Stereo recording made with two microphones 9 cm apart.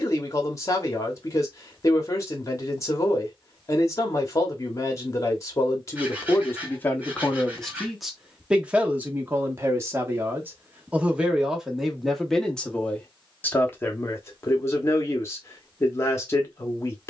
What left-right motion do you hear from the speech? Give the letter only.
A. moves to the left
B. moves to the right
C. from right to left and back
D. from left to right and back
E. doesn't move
D.